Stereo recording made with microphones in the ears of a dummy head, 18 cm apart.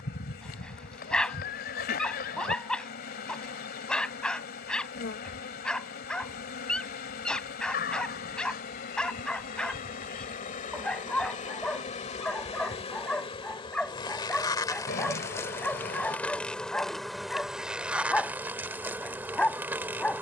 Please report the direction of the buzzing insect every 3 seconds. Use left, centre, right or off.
left, left, left, left, left, centre, centre.